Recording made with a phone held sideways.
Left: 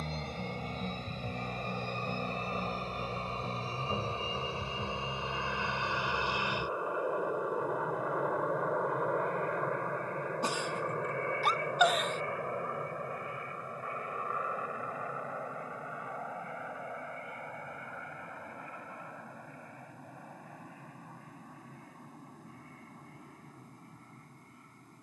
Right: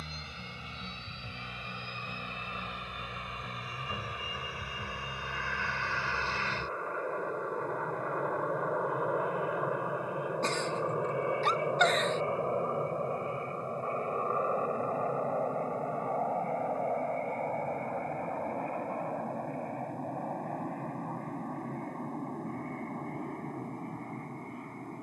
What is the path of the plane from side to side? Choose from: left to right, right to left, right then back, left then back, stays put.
left to right.